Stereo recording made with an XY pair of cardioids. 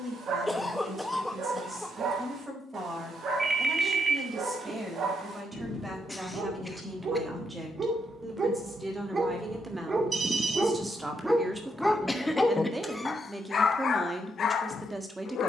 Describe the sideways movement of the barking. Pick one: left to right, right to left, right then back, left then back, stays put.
right to left.